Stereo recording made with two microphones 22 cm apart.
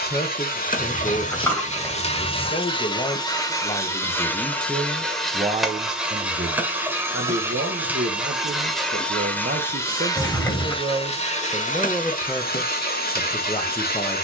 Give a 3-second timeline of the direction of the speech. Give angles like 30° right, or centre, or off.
20° left, centre, 60° right, 30° right, 20° left.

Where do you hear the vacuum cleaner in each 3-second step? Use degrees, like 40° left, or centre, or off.
30° left, 10° left, 10° right, 20° left, 40° left.